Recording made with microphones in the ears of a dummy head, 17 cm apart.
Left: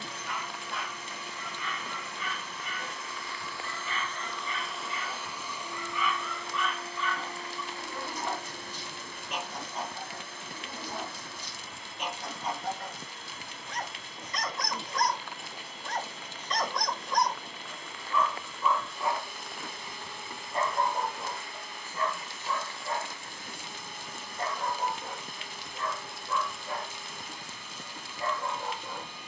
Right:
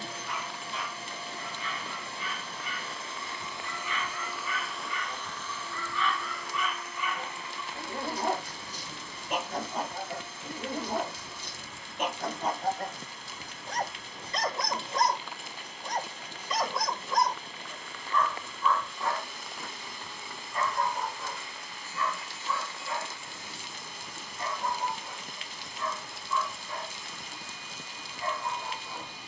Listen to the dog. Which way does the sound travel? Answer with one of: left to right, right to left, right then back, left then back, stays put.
right then back.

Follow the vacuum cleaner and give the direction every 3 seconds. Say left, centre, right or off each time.
right, centre, left, left, left, left, left, left, left, left.